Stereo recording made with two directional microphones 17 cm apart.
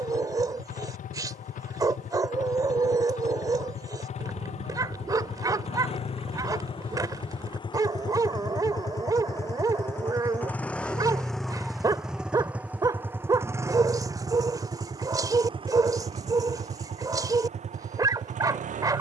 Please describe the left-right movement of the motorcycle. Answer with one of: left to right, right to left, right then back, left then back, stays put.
left to right.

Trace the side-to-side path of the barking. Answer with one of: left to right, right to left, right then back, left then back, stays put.
stays put.